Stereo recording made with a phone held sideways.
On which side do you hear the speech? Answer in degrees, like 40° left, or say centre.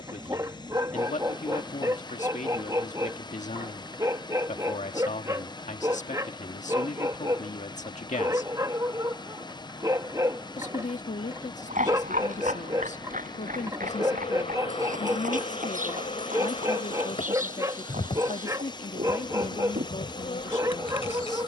70° left.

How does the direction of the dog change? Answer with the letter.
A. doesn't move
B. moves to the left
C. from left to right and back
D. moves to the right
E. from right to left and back
A.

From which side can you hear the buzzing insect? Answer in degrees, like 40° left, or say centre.
50° left.